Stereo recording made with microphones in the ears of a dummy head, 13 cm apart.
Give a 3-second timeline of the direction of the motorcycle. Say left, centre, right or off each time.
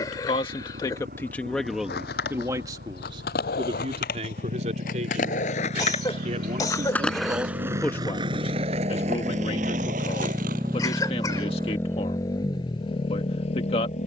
right, right, right, centre, left.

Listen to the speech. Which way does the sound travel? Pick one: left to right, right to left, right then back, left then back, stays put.
right then back.